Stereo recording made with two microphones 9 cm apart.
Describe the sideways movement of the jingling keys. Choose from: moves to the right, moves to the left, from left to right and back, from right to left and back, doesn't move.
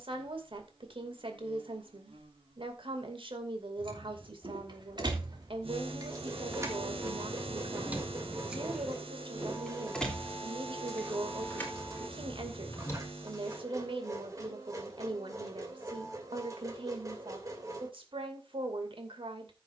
moves to the left.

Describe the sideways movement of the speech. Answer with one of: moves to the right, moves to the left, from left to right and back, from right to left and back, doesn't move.
doesn't move.